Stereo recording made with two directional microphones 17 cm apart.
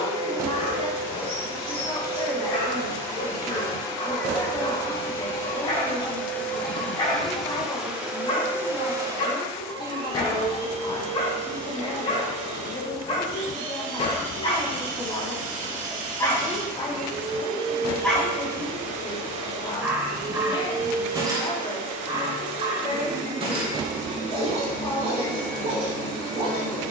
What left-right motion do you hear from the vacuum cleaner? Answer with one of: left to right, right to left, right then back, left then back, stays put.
left to right.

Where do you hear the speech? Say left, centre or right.
left.